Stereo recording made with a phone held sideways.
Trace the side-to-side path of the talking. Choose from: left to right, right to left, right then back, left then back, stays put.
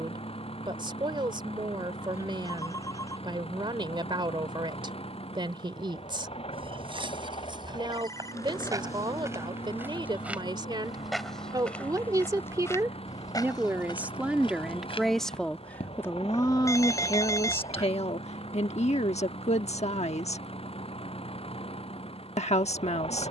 right to left.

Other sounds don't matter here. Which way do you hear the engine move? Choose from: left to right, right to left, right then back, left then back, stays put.
stays put.